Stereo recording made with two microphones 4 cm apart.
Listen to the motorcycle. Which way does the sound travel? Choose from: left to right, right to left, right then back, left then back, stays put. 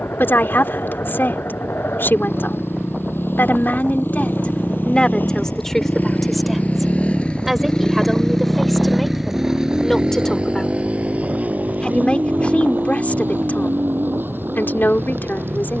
left to right.